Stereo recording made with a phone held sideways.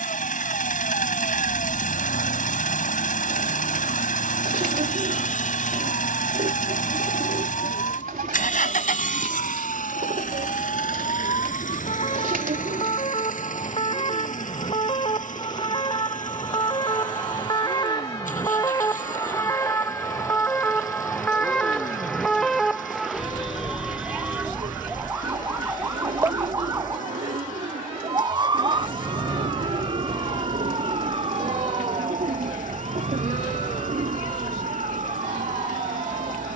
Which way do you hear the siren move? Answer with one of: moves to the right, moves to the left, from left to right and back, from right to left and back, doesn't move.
moves to the right.